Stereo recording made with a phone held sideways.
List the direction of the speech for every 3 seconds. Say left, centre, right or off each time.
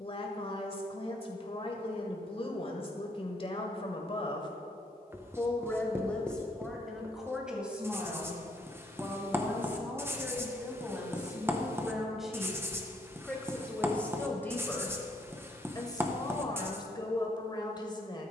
left, left, centre, centre, centre, left.